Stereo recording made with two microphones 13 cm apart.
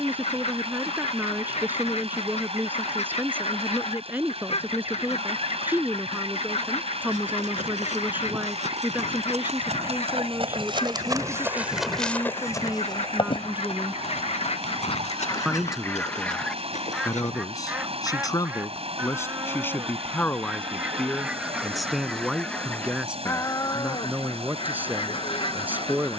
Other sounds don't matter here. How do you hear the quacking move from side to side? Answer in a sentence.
In this clip you hear the quacking move from left to right and back again.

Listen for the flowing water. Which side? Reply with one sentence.
In this clip you hear the flowing water on the right.